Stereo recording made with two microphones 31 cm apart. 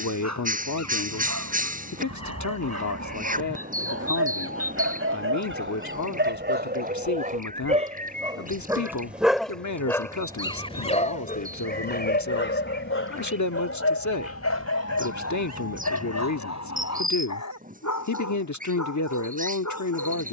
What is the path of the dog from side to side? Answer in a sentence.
You can hear the dog go from the right side to the left.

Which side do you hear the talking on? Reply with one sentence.
You can hear the talking on the left.